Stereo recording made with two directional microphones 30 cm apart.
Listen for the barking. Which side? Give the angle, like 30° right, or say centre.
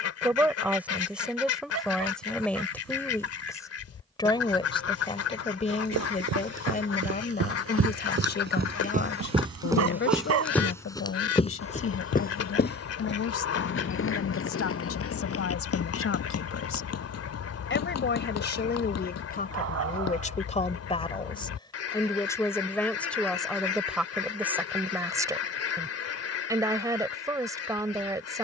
50° right.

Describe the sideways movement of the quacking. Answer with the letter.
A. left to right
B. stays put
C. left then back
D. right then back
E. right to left
B.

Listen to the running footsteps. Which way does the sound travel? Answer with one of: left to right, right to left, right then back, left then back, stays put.
right to left.